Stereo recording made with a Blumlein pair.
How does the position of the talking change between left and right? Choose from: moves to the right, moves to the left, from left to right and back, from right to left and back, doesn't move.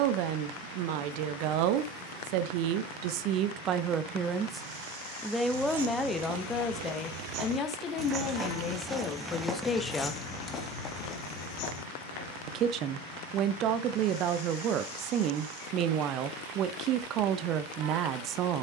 from right to left and back.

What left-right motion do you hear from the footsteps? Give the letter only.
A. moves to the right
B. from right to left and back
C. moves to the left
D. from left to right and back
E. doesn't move
C.